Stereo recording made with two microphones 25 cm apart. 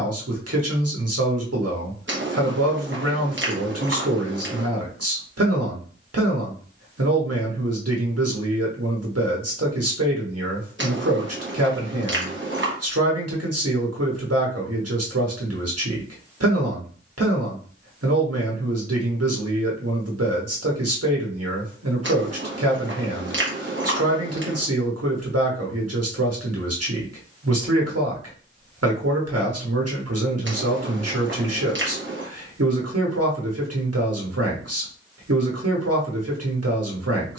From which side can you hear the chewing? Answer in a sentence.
You can hear the chewing on the right.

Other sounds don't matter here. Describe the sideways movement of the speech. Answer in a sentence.
In this clip you hear the speech stay in one place.